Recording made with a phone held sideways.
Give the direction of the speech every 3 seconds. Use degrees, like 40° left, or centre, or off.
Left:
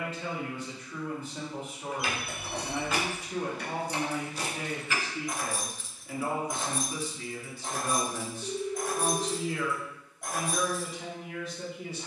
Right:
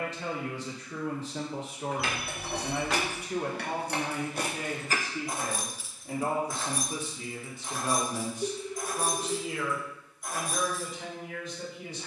80° right, 50° right, 20° right, centre.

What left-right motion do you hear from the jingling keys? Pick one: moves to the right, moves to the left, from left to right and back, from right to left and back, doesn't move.
moves to the left.